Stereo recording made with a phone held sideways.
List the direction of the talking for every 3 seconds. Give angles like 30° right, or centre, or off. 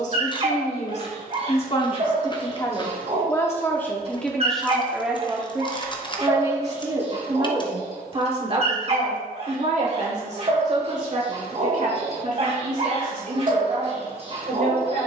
40° left, centre, 30° right, 50° right, 60° right.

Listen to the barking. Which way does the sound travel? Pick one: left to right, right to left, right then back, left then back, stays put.
stays put.